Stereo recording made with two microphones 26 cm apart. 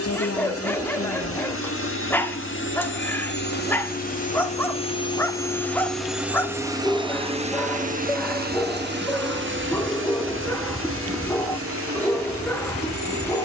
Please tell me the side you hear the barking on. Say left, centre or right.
centre.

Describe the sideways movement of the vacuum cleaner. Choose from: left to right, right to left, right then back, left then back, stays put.
left to right.